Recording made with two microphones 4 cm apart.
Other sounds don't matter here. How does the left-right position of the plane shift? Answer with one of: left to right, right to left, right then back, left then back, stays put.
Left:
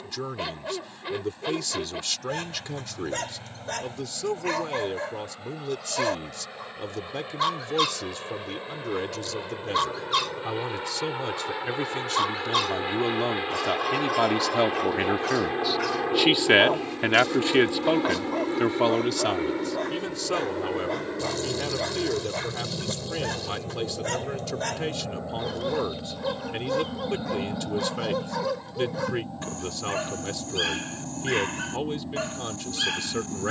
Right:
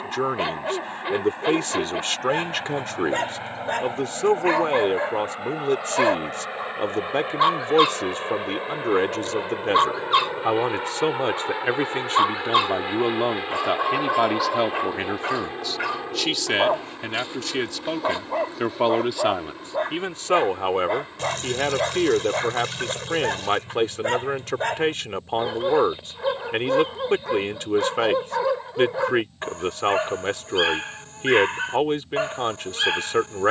right to left.